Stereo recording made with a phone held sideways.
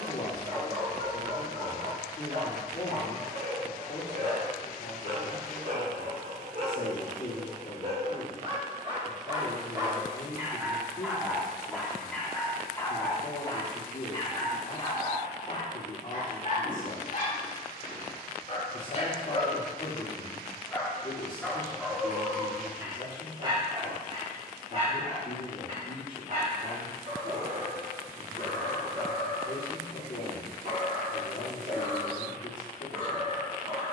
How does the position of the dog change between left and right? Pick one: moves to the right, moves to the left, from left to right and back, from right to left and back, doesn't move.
from right to left and back.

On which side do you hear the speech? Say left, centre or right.
left.